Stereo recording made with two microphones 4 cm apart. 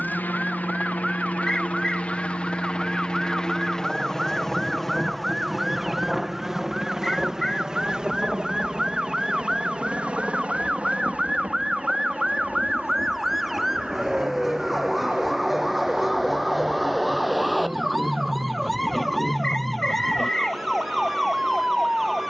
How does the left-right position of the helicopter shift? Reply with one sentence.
You can hear the helicopter move to the right.